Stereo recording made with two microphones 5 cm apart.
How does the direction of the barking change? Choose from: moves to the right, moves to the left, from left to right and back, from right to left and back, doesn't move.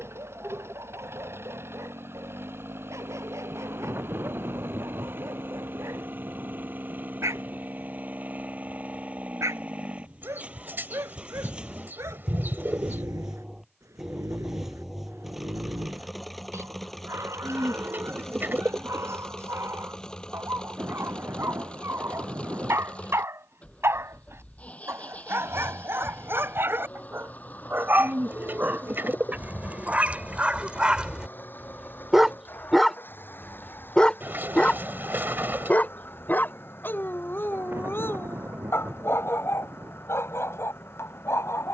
moves to the left.